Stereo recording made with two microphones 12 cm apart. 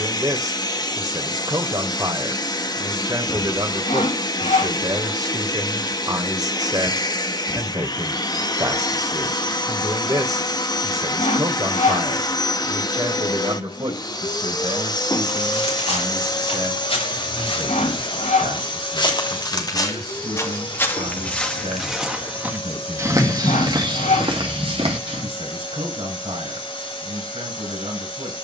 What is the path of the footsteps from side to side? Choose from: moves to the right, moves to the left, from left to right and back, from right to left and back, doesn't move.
moves to the right.